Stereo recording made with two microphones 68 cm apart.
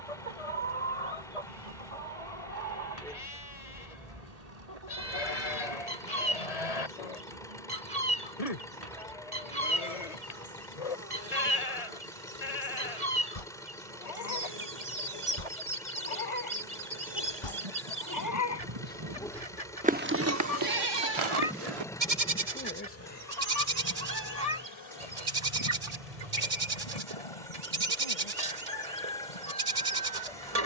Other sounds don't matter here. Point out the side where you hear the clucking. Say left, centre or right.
right.